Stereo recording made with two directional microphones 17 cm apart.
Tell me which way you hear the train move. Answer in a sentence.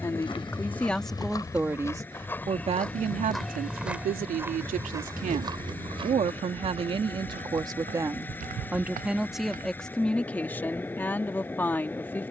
You can hear the train stay put.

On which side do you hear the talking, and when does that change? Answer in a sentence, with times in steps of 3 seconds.
In this clip you hear the talking in the centre from 0 s, on the right from 3 s and in the centre from 9 s.